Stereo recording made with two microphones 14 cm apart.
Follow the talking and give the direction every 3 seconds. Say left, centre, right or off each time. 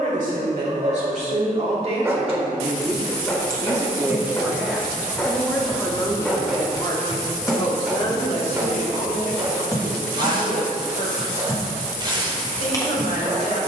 right, centre, left, left, left.